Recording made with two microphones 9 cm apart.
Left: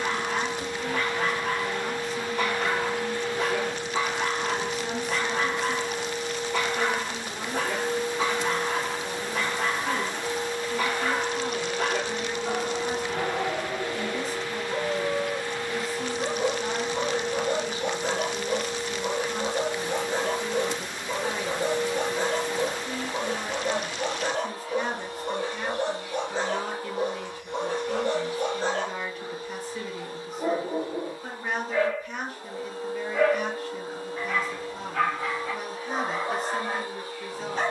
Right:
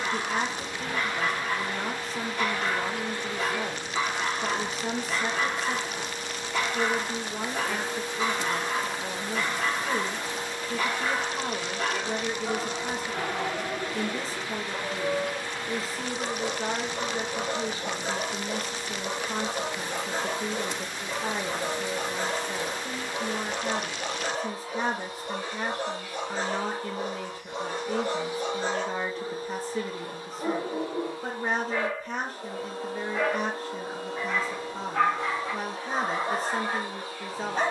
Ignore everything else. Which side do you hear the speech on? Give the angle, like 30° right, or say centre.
30° right.